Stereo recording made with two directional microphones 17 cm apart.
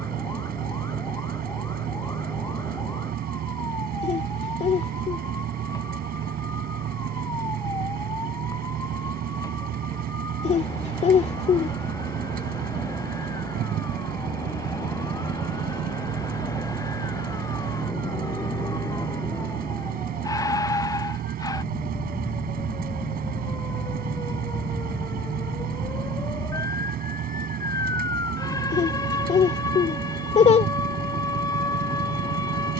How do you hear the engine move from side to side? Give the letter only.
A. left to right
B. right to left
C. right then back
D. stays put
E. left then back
D.